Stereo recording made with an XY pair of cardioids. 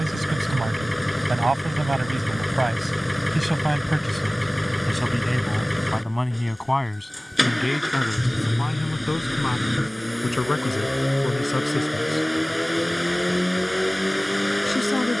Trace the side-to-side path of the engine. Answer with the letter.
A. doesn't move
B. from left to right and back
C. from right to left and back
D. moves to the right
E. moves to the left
A.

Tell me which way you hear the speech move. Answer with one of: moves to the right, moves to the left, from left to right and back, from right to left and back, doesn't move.
moves to the left.